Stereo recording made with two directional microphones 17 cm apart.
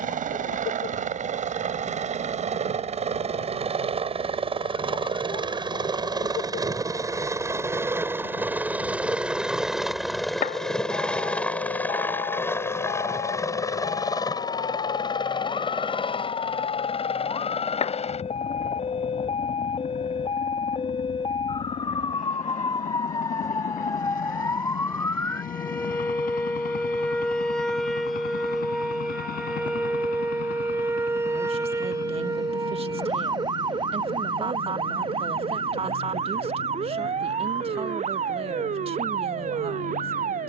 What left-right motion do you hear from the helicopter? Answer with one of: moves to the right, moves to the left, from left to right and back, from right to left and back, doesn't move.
moves to the left.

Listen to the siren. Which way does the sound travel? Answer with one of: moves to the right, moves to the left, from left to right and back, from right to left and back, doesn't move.
moves to the right.